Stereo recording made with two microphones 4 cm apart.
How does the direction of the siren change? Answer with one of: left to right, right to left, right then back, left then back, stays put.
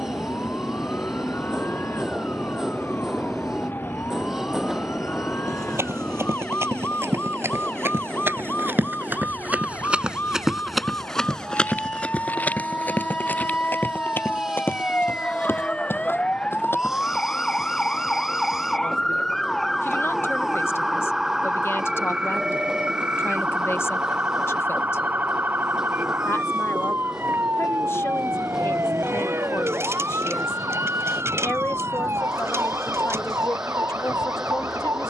left to right.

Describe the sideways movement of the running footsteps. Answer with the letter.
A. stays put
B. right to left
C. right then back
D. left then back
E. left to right
B.